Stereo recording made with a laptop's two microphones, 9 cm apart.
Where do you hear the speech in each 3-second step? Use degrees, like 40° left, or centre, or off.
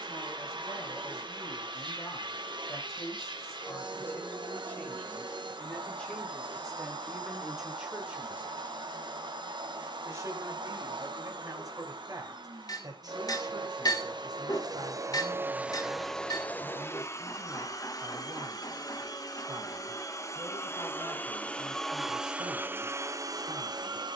40° left, 20° left, centre, 40° right, 50° right, 60° right, 60° right, 60° right.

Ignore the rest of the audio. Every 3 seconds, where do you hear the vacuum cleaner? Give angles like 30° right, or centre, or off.
70° right, 70° right, 70° right, 70° right, 60° right, 10° left, 40° left, 20° right.